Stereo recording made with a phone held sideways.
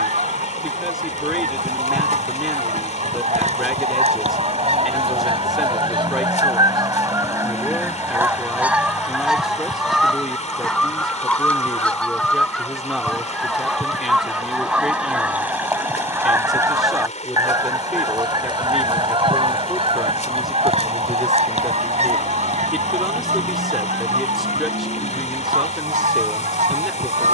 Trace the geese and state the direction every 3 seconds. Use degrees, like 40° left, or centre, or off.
70° right, 50° right, 20° right, centre, centre, 20° right, 40° right, 60° right, 70° right.